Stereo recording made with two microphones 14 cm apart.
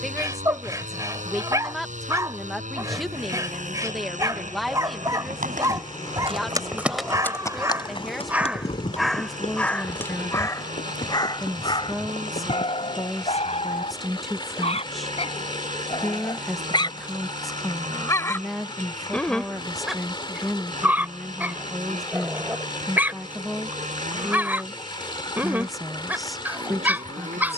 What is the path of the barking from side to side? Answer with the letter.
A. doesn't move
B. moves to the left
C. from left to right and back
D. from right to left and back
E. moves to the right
D.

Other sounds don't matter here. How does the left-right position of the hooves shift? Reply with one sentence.
You can hear the hooves move to the left.